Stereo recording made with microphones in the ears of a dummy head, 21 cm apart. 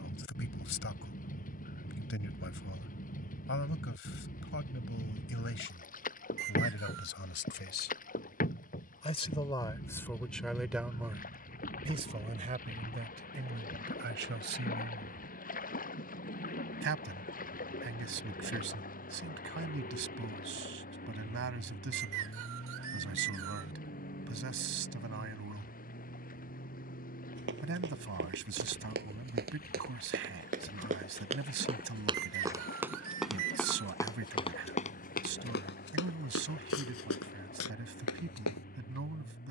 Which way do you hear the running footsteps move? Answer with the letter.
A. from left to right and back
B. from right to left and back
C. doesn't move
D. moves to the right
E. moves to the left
E.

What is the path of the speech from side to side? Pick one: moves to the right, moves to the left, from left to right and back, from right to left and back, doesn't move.
moves to the right.